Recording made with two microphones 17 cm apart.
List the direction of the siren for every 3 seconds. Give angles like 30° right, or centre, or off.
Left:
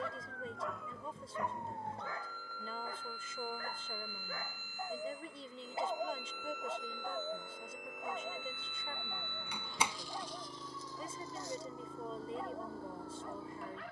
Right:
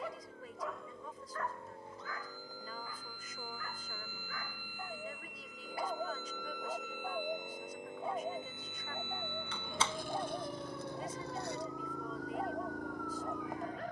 70° left, 50° left, 20° right, 60° right, 70° right.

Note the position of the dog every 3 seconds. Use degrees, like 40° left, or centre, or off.
20° left, 30° left, 20° right, 40° right, 40° right.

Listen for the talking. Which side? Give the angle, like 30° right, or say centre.
30° left.